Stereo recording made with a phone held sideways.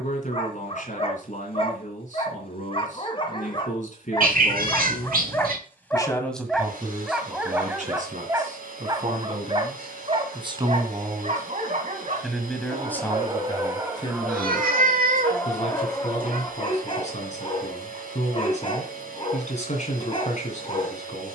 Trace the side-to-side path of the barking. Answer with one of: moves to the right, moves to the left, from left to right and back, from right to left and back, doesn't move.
from left to right and back.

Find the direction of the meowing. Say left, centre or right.
right.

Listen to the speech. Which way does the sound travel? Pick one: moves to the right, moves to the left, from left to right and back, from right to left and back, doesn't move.
from left to right and back.